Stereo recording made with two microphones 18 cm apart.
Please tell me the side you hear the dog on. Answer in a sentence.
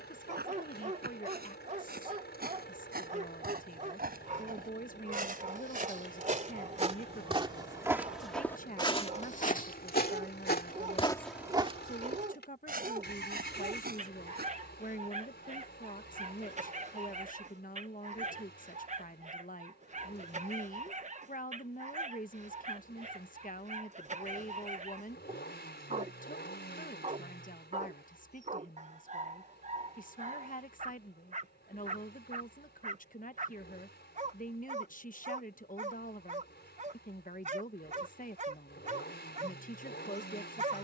You can hear the dog on the right.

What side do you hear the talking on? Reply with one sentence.
You can hear the talking on the left.